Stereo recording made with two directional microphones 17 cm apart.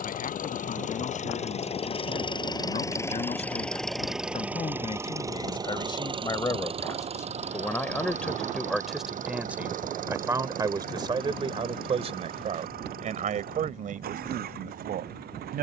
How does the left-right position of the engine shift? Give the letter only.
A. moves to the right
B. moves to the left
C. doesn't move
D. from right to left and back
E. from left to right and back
A.